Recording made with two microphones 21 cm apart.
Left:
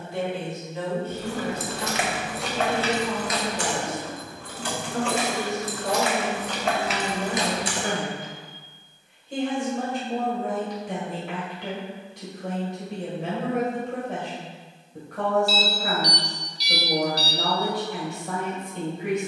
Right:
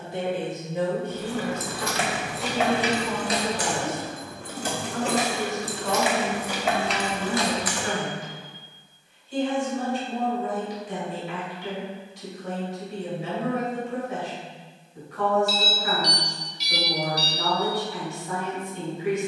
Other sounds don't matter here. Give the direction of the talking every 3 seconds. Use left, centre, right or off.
centre, left, left, left, left, left, left.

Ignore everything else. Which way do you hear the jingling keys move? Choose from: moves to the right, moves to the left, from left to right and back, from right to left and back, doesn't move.
from left to right and back.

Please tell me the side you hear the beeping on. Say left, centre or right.
left.